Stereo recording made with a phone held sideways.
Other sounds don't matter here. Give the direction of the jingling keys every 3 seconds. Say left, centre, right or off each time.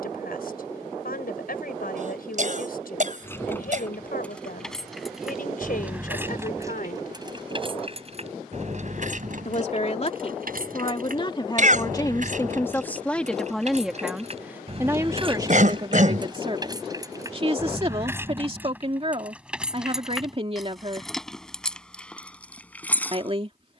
off, centre, right, right, right, right, centre, centre.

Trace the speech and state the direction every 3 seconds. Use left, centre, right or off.
left, left, left, left, centre, right, right, right.